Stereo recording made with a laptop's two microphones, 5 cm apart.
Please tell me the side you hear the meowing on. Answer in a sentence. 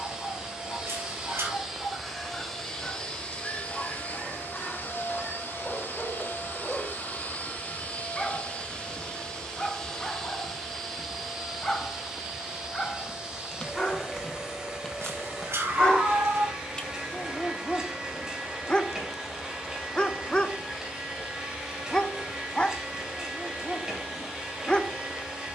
You can hear the meowing on the right.